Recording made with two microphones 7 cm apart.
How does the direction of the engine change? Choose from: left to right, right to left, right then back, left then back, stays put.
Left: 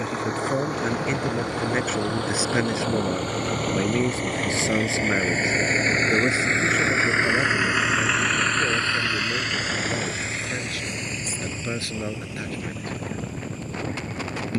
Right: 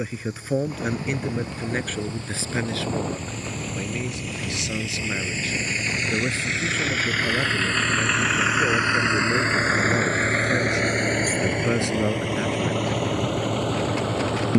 left to right.